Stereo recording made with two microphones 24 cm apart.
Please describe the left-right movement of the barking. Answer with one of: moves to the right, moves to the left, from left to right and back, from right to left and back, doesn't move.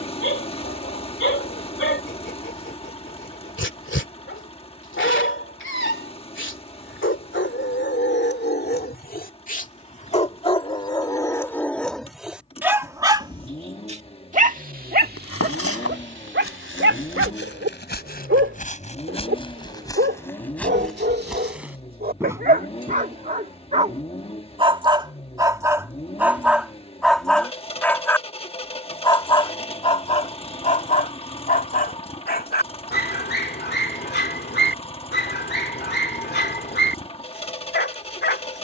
from left to right and back.